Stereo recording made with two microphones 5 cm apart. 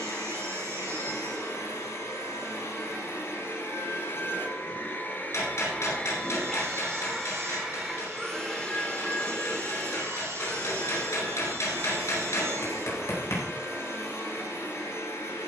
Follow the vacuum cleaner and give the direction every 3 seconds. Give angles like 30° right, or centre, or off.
70° left, 50° left, 10° left, 50° left, 70° left.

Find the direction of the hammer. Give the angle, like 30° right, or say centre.
80° left.